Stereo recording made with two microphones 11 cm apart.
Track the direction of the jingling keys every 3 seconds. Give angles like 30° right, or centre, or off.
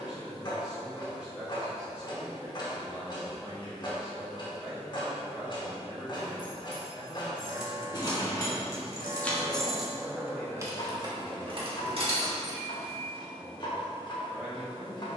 off, off, 40° left, 20° right, 60° right.